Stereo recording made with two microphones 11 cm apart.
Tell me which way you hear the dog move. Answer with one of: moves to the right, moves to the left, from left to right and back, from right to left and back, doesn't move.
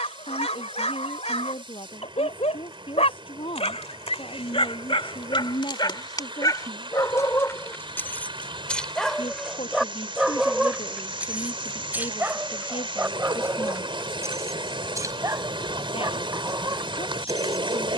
moves to the right.